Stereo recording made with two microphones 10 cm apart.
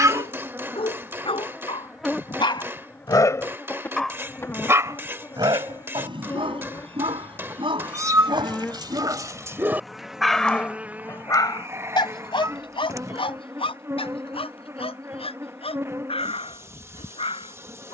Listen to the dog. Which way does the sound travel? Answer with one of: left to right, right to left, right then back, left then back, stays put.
right then back.